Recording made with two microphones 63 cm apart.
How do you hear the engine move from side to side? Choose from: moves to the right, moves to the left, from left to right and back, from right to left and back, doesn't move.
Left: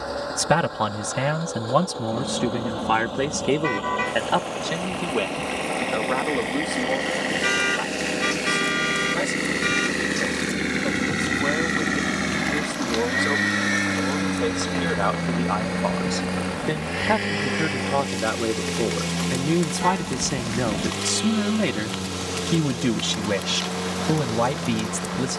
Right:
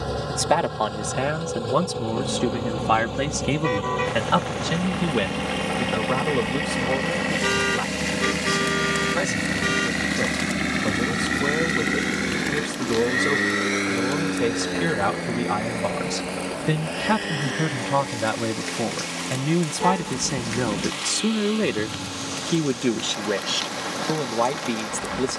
moves to the left.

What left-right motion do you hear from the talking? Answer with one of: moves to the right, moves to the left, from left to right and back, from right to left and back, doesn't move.
from left to right and back.